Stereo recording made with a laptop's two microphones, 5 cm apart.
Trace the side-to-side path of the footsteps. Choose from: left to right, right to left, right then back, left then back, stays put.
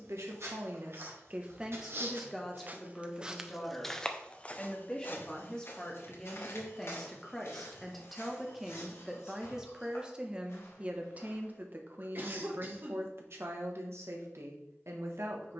right to left.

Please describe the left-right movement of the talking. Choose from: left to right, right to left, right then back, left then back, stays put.
left then back.